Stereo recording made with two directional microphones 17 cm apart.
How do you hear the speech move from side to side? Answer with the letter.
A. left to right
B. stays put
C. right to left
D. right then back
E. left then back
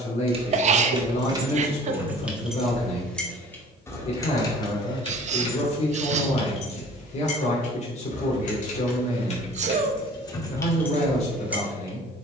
B.